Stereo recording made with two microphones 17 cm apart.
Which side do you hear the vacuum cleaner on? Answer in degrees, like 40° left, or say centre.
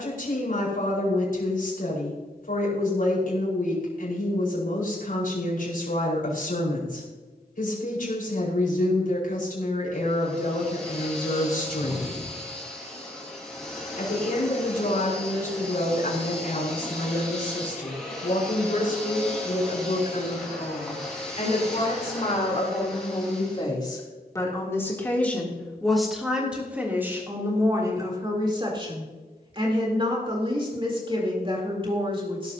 centre.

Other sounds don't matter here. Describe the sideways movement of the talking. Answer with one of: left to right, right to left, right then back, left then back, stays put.
left to right.